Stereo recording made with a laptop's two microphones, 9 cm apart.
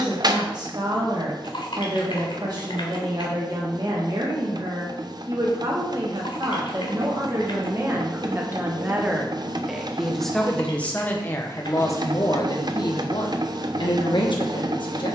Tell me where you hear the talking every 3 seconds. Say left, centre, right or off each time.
right, right, right, centre, left.